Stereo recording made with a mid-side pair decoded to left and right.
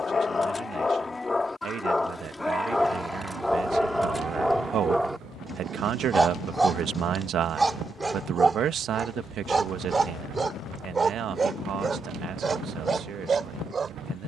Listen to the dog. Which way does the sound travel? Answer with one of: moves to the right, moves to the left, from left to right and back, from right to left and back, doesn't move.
moves to the right.